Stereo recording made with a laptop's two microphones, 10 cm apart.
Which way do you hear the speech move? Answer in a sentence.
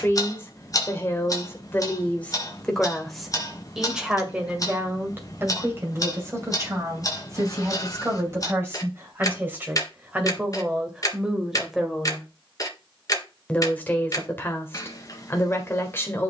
You can hear the speech go right and come back.